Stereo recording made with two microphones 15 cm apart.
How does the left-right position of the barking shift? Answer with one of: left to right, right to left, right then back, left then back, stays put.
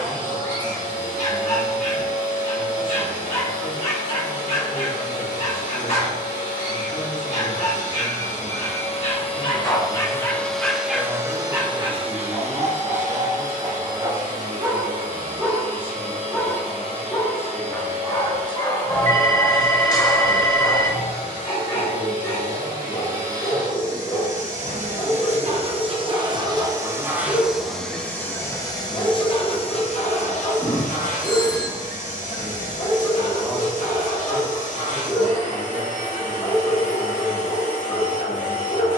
right then back.